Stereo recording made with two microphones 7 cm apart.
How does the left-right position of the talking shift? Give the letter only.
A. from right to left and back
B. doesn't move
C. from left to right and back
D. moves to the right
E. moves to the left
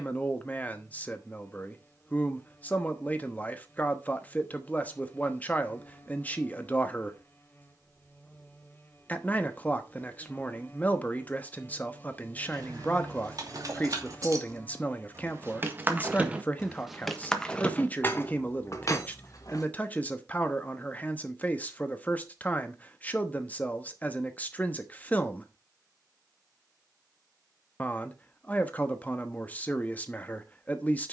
B.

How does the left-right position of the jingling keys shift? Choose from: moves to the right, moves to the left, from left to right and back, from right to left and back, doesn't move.
moves to the left.